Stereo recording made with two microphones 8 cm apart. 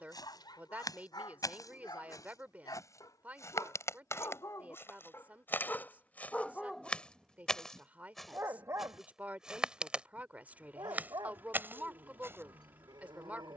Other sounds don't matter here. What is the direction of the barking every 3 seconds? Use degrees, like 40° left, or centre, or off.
60° left, 40° left, 10° right, 60° right, 70° right.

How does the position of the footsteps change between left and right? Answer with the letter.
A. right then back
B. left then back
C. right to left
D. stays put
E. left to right
E.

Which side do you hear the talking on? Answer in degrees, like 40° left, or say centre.
20° right.